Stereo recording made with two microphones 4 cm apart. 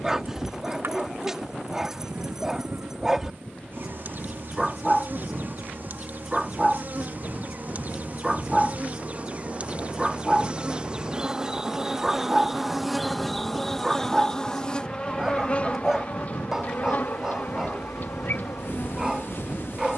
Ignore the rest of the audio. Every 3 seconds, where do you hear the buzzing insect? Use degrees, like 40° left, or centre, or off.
60° right, 60° right, 50° right, 30° right, centre, 40° left, 50° left.